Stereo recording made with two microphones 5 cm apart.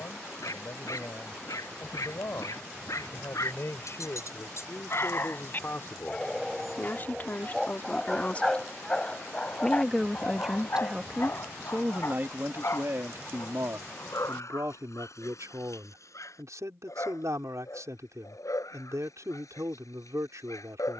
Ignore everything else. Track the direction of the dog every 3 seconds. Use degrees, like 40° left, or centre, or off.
80° left, 60° left, 10° left, 40° left, 60° left, 70° left, 80° left.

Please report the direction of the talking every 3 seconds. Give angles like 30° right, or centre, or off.
60° left, 50° left, 30° left, 10° right, 60° right, 70° right, 70° right.